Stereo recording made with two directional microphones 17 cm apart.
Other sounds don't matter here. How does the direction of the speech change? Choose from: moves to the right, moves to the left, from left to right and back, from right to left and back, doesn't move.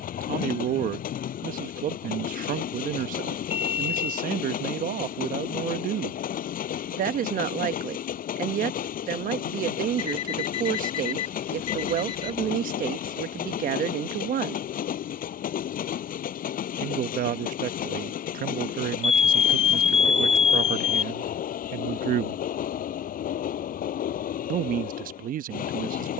doesn't move.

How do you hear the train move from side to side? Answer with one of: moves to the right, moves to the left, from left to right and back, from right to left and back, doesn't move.
doesn't move.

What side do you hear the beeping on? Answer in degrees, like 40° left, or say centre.
40° left.